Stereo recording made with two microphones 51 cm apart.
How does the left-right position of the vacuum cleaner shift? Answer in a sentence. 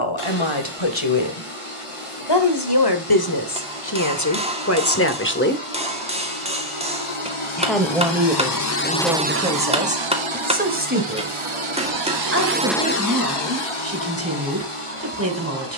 In this clip you hear the vacuum cleaner go right and come back.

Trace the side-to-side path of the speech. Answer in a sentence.
You can hear the speech move to the right.